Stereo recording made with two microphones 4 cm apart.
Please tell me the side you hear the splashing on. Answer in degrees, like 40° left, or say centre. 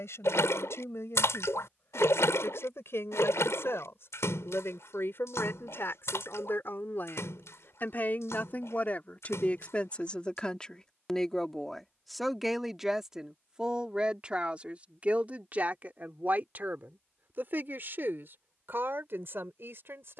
80° left.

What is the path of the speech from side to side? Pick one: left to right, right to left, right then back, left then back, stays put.
left to right.